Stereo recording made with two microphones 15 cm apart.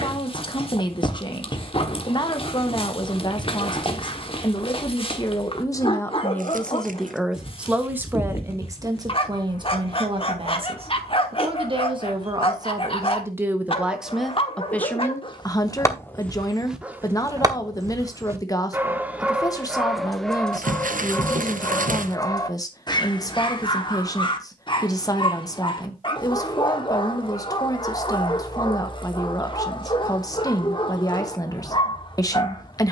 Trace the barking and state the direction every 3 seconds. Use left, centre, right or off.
left, left, left, left, left, centre, centre, left, left, left, left.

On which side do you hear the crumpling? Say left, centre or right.
right.